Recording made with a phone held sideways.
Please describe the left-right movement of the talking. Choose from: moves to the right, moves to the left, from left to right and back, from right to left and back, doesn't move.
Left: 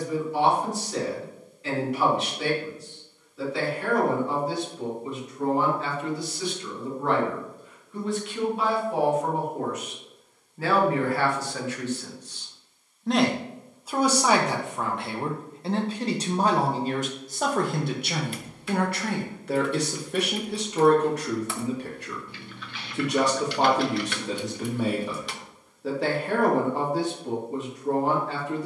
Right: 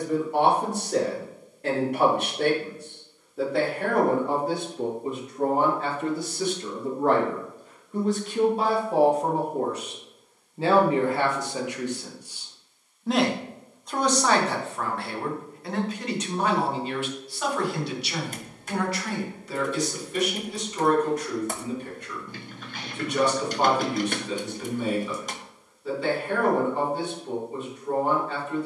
moves to the left.